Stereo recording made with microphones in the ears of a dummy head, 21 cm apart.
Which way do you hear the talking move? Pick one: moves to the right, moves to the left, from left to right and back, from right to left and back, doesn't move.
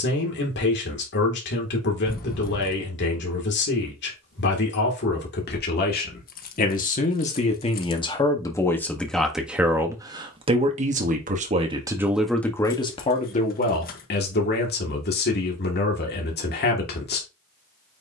from left to right and back.